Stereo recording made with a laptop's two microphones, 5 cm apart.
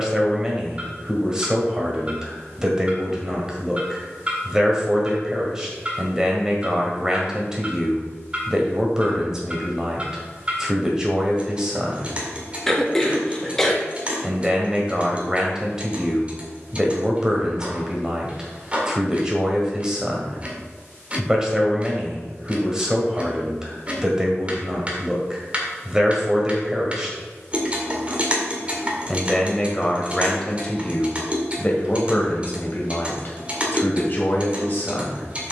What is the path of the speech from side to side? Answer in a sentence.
You can hear the speech travel towards the left.